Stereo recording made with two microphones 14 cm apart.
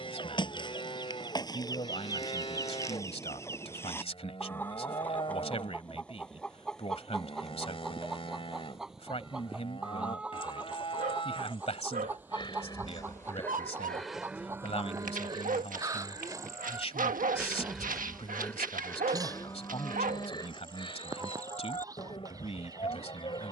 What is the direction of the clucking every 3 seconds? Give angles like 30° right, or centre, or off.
30° left, 10° left, centre, 10° right, 20° right, 20° right, 30° right, 30° right.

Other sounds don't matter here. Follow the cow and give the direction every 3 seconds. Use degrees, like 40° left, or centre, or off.
40° left, 40° left, 40° left, 40° left, 10° left, 20° right, 20° left, 40° left.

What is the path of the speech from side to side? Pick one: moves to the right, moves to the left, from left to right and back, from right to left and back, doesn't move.
doesn't move.